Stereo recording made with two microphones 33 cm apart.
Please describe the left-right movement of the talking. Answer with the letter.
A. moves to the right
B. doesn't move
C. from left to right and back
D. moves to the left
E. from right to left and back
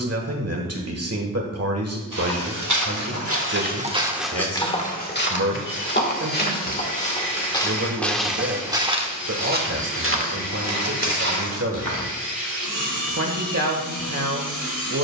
B.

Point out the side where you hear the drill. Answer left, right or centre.
left.